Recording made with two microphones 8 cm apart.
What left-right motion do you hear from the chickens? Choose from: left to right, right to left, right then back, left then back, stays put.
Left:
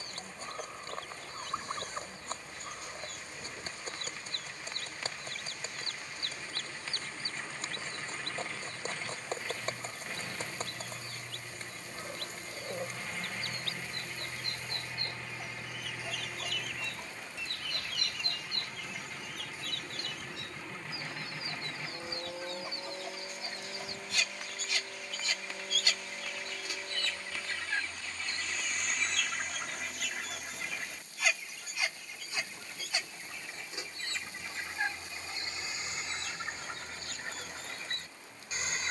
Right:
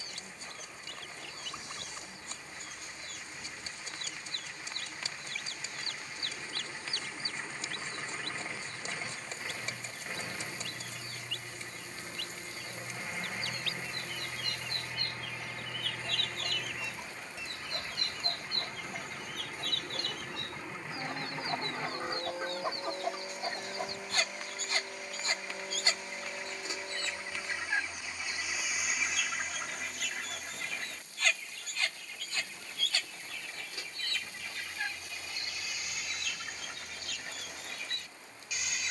right then back.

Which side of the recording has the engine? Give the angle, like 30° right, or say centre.
10° right.